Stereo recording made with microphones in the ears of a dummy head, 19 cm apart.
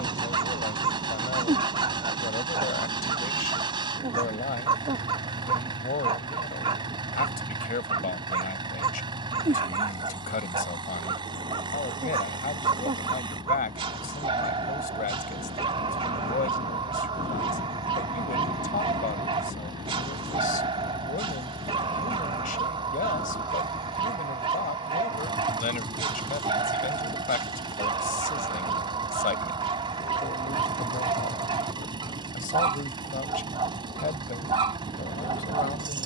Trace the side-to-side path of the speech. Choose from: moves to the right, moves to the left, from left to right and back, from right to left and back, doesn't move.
doesn't move.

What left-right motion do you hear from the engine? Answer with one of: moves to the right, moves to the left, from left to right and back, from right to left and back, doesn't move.
doesn't move.